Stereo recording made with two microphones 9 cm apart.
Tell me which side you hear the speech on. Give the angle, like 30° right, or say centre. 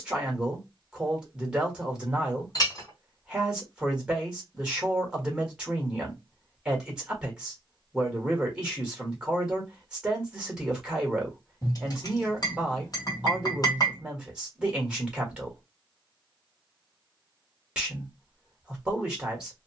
10° right.